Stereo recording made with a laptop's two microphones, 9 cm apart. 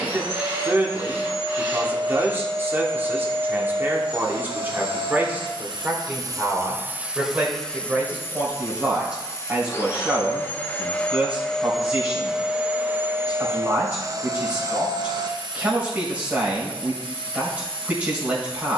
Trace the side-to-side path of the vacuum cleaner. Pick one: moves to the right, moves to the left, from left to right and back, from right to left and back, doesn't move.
from right to left and back.